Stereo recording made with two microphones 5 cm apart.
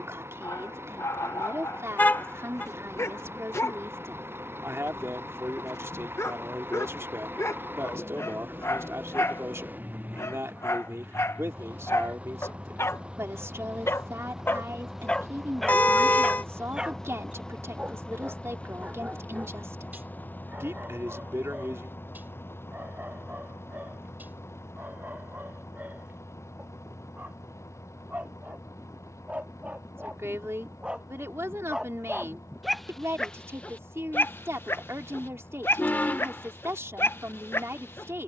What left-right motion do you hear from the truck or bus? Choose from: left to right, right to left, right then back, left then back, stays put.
right to left.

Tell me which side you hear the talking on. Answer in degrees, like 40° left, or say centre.
60° right.